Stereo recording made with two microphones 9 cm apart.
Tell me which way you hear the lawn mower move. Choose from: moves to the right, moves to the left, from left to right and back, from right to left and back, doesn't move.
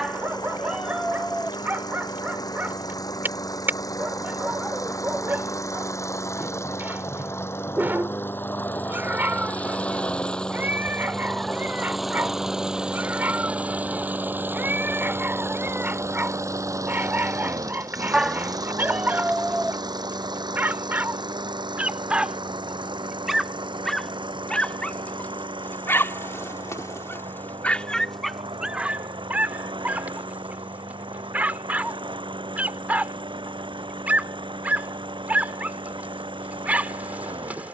moves to the right.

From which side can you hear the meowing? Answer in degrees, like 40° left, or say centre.
10° right.